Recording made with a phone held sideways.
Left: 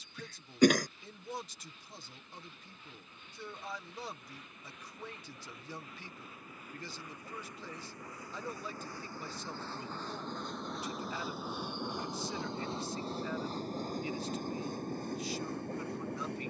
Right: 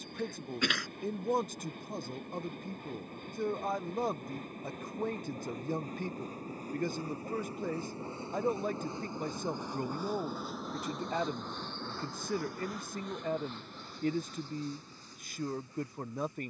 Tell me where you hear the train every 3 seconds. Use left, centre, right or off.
right, right, right, centre, left, left.